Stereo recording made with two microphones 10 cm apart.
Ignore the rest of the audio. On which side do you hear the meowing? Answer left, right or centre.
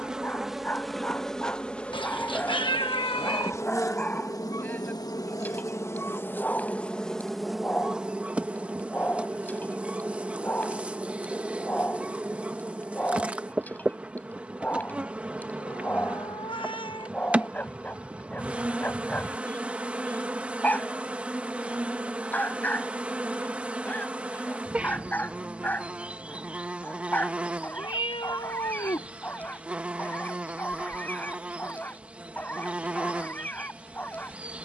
left.